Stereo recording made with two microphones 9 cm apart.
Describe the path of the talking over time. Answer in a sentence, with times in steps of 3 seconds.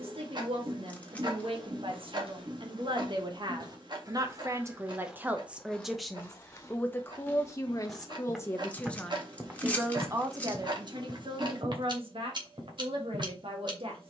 You can hear the talking on the right from 0 s, on the left from 6 s and on the right from 9 s.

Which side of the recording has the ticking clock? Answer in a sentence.
You can hear the ticking clock on the right.